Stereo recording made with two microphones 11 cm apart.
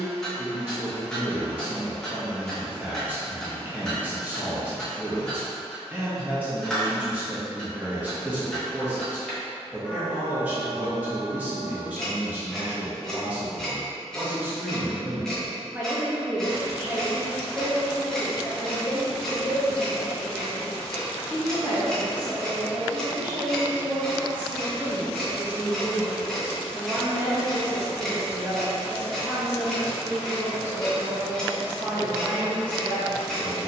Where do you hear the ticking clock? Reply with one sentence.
You can hear the ticking clock in the centre.